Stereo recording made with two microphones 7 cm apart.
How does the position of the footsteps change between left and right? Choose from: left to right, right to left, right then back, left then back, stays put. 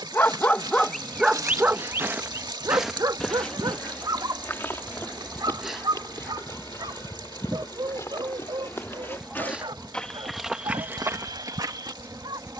left then back.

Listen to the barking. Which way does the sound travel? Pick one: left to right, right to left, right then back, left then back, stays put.
left to right.